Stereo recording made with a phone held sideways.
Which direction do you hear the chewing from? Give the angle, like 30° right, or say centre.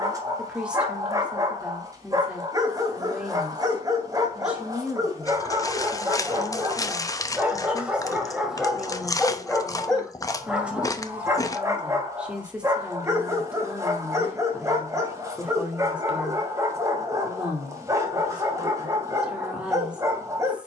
20° left.